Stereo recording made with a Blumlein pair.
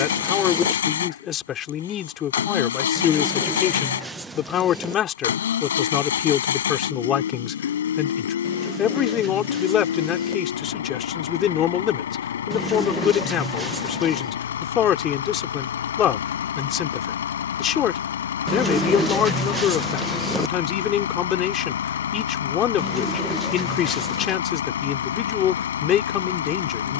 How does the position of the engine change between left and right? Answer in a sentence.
In this clip you hear the engine stay in one place.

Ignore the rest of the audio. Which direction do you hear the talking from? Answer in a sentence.
In this clip you hear the talking on the left.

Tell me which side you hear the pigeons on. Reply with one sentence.
In this clip you hear the pigeons in the centre.